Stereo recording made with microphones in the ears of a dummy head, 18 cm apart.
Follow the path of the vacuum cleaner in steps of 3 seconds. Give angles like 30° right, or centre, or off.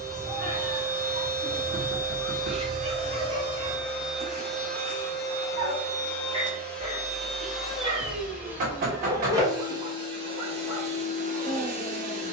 50° right, centre, centre, 30° right.